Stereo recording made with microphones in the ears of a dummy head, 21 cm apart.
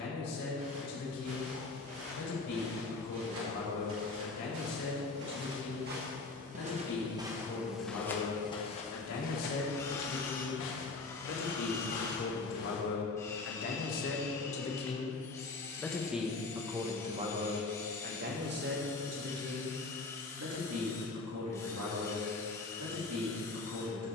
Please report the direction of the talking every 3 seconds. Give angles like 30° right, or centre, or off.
80° left, 80° left, 70° left, 60° left, 40° left, 10° right, 60° right, 70° right.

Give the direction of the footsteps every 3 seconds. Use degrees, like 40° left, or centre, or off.
70° right, 60° right, 10° right, 50° left, 70° left, off, off, off.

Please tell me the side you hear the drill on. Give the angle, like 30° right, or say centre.
10° left.